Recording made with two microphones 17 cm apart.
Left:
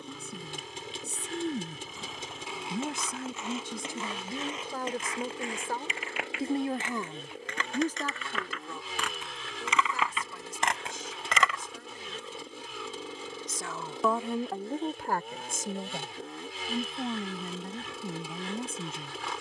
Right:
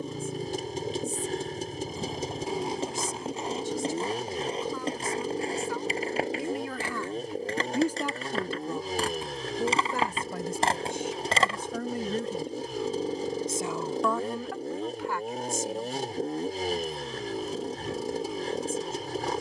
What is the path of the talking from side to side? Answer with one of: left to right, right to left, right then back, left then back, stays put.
right then back.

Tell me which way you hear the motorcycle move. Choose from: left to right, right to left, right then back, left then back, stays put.
stays put.